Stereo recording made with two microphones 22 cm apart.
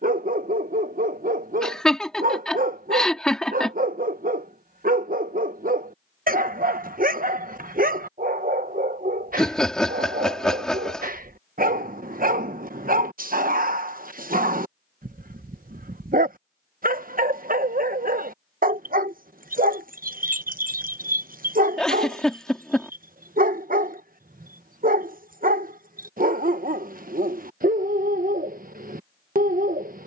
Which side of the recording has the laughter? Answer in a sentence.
You can hear the laughter in the centre.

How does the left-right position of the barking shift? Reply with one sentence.
In this clip you hear the barking stay in one place.